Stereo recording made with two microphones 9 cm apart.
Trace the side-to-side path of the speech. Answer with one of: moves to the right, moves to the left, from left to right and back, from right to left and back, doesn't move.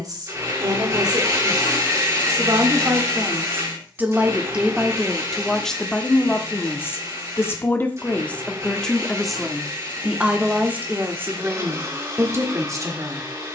from right to left and back.